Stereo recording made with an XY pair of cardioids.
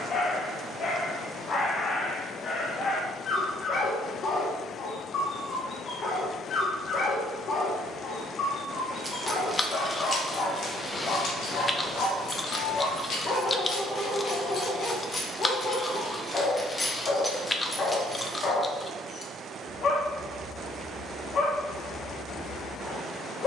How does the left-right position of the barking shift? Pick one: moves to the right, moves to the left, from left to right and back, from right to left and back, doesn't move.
doesn't move.